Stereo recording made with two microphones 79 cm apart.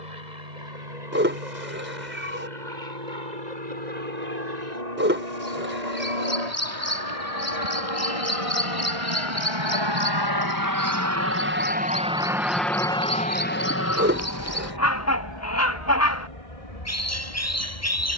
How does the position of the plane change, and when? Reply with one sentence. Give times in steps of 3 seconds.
In this clip you hear the plane on the right from 0 s, in the centre from 12 s and on the left from 15 s.